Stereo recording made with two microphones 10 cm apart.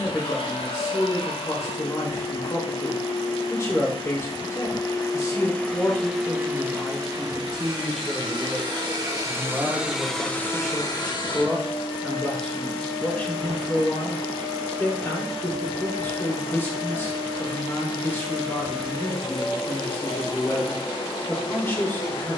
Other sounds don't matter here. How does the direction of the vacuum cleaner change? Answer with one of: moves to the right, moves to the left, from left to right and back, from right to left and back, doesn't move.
from left to right and back.